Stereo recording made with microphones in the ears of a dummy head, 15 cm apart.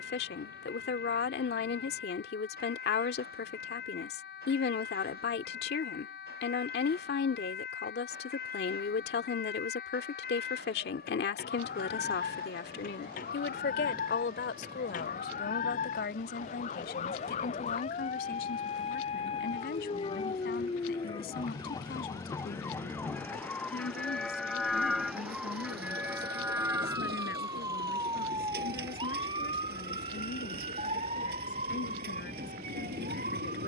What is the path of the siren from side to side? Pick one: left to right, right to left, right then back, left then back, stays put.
left to right.